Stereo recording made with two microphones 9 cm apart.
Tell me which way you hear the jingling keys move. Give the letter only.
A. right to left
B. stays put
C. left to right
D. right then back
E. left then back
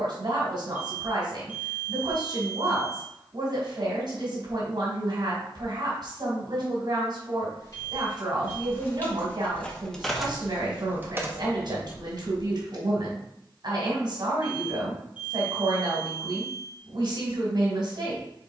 C.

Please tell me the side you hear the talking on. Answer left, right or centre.
right.